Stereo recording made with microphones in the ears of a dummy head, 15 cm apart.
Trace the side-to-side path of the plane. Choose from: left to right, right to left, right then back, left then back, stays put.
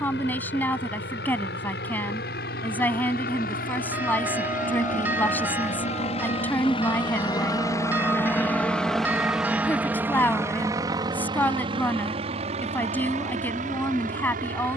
left to right.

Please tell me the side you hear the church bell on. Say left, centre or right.
centre.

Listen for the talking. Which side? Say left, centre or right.
centre.